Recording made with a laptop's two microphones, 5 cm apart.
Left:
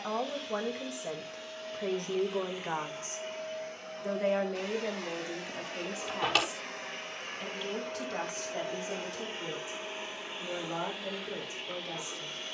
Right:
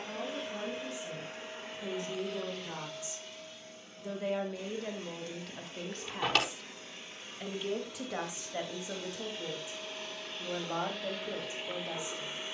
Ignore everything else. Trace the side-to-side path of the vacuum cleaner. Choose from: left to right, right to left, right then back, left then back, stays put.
left then back.